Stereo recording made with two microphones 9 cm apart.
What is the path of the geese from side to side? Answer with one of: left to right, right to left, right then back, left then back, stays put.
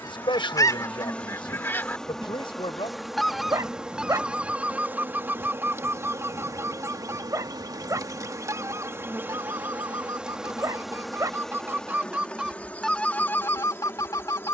right then back.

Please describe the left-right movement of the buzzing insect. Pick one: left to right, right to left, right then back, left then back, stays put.
right then back.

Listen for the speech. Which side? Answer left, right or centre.
left.